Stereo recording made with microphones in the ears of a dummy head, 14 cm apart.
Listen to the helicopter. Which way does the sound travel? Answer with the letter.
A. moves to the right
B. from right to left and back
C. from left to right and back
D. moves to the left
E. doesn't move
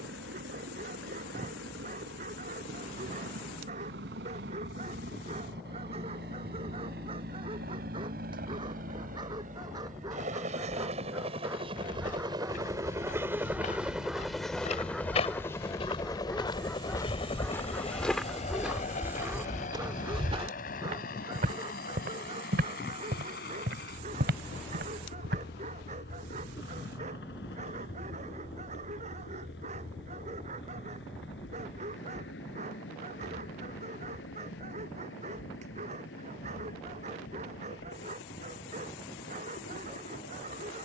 D.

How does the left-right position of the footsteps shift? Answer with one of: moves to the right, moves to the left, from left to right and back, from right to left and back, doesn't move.
moves to the right.